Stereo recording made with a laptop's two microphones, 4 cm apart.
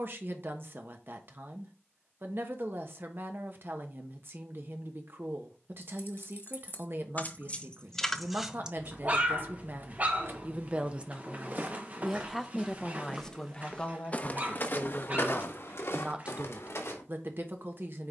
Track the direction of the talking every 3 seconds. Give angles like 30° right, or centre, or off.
50° right, 50° right, 50° right, 30° right, 10° left, 30° right.